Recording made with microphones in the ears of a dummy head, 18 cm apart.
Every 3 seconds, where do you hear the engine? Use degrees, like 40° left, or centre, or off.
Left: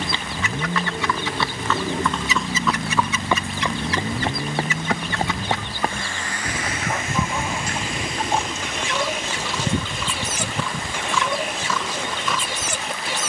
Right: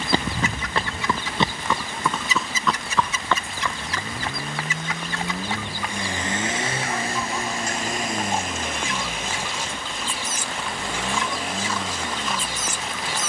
60° left, 10° left, 30° right, 50° right, 60° right.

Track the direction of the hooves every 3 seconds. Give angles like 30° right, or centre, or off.
20° right, 30° left, 50° left, 60° left, 60° left.